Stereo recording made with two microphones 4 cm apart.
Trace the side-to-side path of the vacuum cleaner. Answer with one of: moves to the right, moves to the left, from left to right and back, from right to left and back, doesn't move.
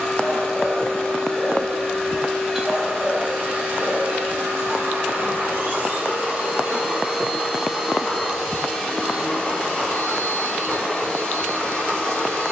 from left to right and back.